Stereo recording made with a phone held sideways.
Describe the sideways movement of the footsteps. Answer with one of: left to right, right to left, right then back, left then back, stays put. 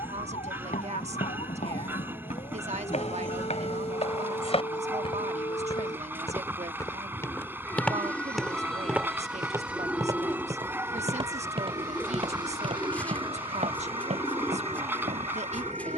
left to right.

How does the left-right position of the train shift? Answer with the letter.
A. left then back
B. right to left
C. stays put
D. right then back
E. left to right
C.